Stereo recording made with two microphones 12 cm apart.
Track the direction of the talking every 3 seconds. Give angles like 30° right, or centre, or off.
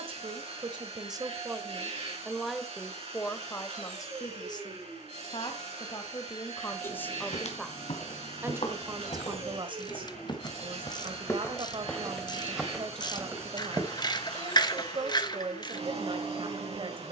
20° right, 30° left, 10° left, 40° right, 40° right, 40° right.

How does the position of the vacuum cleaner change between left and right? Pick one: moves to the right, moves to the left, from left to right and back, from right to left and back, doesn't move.
doesn't move.